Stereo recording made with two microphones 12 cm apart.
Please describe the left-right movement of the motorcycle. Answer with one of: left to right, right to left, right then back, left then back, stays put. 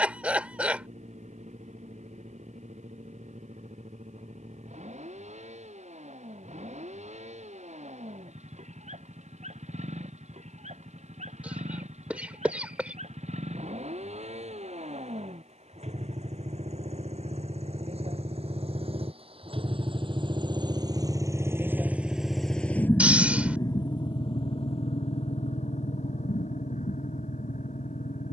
right to left.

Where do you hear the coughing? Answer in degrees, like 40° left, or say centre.
10° right.